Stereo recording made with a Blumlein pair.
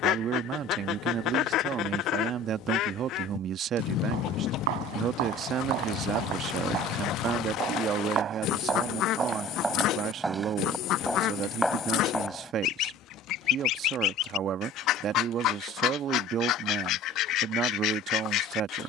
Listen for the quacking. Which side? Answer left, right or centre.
left.